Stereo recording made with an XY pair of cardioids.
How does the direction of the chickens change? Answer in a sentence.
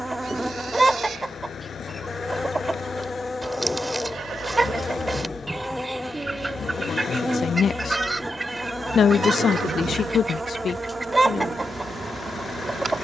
In this clip you hear the chickens stay put.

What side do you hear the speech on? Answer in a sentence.
In this clip you hear the speech on the left.